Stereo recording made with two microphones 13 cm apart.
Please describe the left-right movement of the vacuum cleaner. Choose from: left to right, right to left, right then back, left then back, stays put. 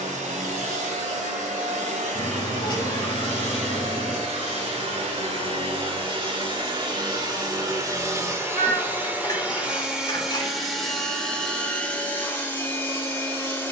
right to left.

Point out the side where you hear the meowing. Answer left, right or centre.
left.